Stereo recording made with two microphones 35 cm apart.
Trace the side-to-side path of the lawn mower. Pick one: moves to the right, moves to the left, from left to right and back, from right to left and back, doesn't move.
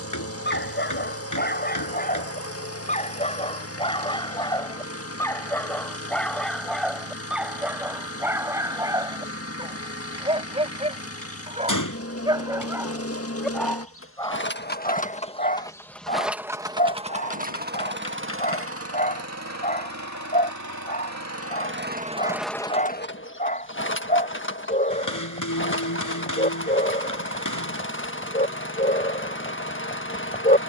from left to right and back.